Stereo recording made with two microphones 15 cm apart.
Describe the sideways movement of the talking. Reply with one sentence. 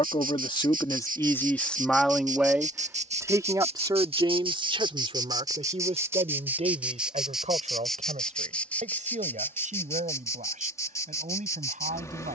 You can hear the talking travel towards the right.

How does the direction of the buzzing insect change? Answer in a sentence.
You can hear the buzzing insect travel towards the left.